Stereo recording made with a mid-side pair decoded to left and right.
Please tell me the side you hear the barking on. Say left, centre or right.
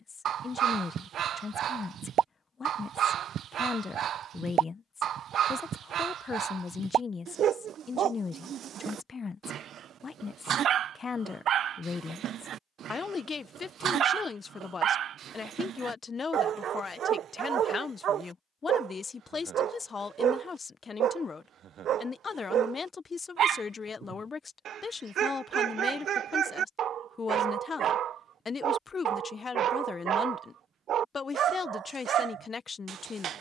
right.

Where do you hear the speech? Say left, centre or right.
left.